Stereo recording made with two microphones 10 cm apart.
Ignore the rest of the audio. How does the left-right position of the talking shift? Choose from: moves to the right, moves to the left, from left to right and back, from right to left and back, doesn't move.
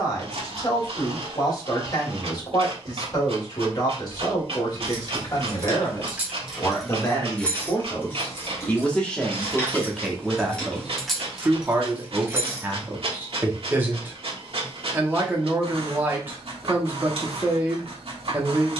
moves to the right.